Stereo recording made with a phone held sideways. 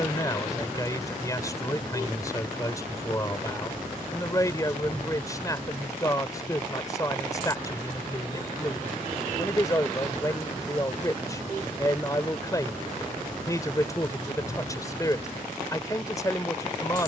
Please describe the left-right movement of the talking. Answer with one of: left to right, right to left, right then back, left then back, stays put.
stays put.